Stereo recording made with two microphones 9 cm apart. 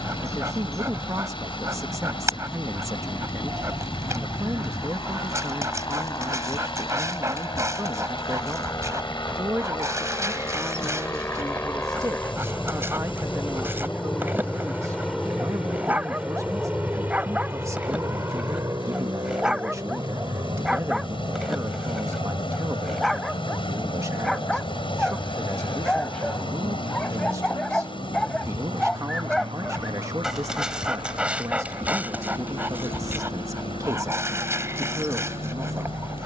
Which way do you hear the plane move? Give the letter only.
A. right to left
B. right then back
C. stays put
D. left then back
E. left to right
E.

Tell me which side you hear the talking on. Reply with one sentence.
You can hear the talking on the right.